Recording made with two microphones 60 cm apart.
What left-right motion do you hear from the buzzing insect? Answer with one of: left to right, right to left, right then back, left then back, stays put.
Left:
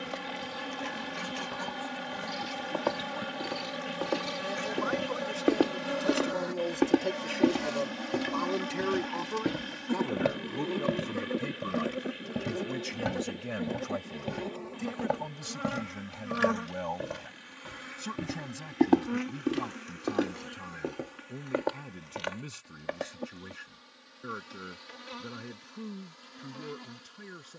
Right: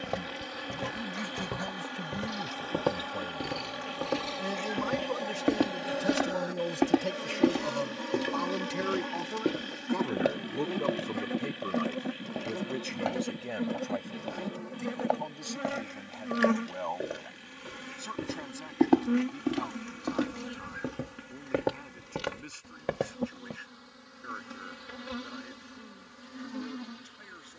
left to right.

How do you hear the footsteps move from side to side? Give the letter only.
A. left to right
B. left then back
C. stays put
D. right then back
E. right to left
B.